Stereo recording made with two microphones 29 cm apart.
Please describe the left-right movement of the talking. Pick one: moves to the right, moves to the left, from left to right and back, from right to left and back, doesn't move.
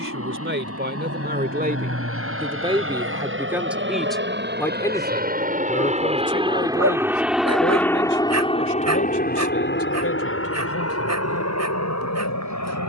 moves to the left.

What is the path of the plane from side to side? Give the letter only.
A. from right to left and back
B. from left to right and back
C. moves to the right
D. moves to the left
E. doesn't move
D.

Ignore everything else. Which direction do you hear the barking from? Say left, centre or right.
right.